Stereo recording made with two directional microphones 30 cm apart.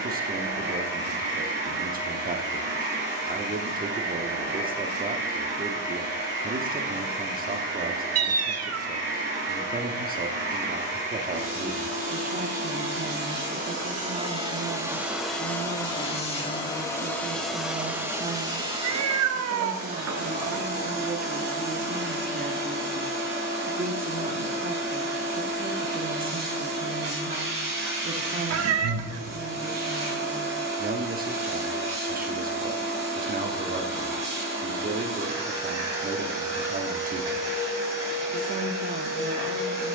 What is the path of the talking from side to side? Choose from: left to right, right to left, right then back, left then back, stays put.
stays put.